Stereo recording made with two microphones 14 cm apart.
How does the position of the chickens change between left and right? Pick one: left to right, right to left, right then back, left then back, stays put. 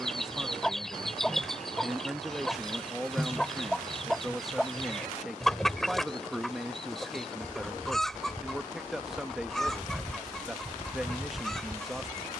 stays put.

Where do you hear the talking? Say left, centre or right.
centre.